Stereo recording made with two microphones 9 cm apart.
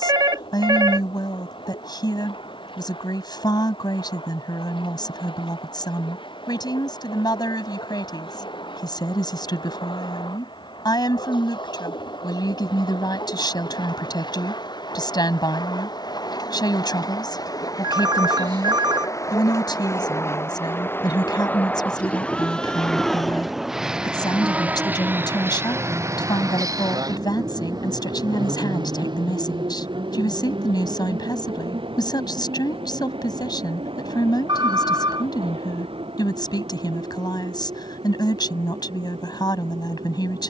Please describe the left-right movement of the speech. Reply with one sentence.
You can hear the speech stay in one place.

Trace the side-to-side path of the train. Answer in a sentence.
In this clip you hear the train go from the left side to the right.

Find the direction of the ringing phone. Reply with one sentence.
In this clip you hear the ringing phone on the right.